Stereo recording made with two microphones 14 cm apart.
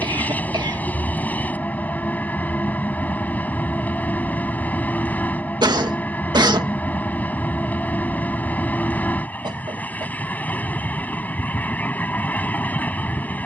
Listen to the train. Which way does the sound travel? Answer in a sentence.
In this clip you hear the train stay in one place.